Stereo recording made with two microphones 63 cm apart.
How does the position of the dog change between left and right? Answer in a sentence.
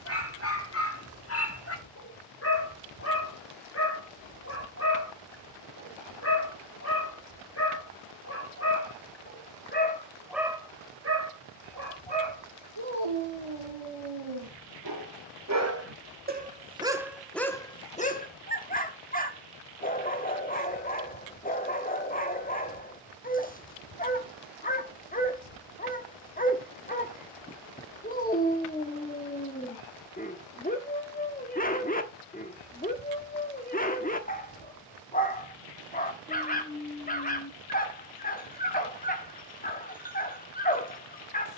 In this clip you hear the dog move from left to right and back again.